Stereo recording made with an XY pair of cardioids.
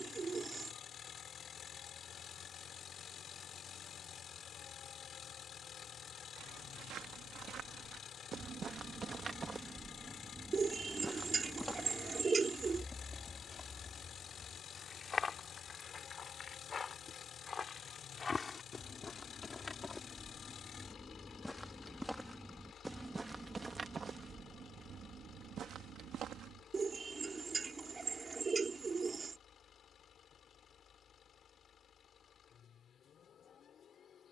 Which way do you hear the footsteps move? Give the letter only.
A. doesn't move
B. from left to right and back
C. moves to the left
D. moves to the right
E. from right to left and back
E.